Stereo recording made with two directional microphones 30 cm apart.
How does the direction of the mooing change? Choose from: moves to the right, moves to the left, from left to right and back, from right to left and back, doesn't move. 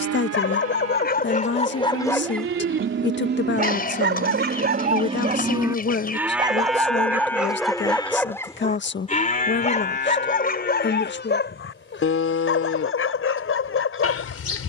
moves to the left.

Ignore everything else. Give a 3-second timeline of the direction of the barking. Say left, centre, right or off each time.
left, right, centre, left, left.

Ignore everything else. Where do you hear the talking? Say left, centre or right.
left.